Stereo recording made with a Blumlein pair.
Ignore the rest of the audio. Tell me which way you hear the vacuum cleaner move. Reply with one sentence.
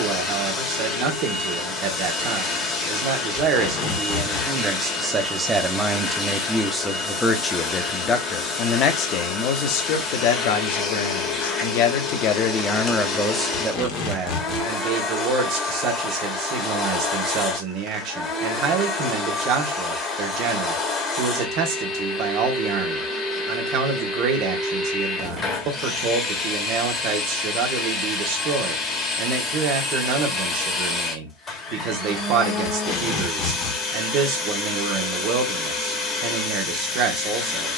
You can hear the vacuum cleaner stay put.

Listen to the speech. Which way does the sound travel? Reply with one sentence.
In this clip you hear the speech move from right to left and back again.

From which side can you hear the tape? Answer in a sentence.
In this clip you hear the tape on the left.